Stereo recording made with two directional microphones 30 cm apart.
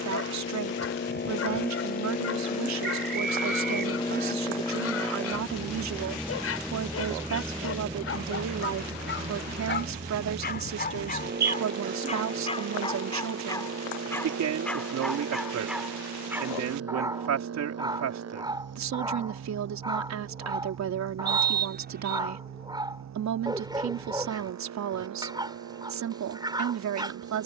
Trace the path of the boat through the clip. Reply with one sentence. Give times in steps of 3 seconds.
You can hear the boat on the left from 0 s, in the centre from 3 s and on the right from 9 s.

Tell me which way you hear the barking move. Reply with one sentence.
You can hear the barking go from the left side to the right.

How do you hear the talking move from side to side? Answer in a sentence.
In this clip you hear the talking stay put.